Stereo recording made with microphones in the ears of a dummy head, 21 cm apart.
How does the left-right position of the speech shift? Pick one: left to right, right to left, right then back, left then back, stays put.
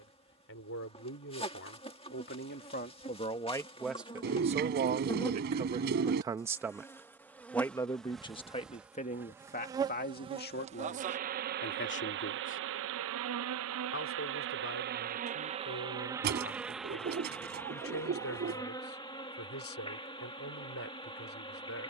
right then back.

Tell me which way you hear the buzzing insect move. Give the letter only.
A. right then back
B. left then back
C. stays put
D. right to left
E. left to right
A.